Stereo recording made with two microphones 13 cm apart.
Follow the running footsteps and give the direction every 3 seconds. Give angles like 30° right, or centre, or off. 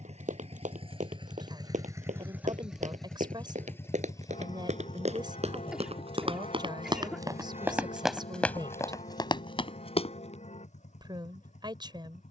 70° right, 60° right, 20° right, 40° left.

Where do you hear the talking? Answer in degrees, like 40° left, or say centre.
30° right.